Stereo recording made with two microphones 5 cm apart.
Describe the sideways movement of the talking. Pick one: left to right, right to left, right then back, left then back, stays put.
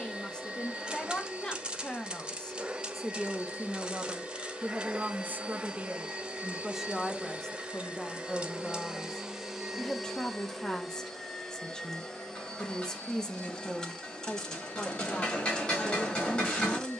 right then back.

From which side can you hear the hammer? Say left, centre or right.
left.